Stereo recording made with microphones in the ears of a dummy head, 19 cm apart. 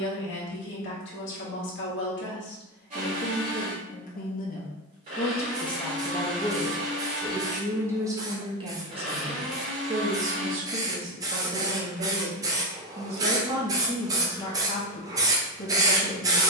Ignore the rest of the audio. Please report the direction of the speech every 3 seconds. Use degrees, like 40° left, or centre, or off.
60° left, 40° left, 10° right, 40° right, 10° right, 50° left.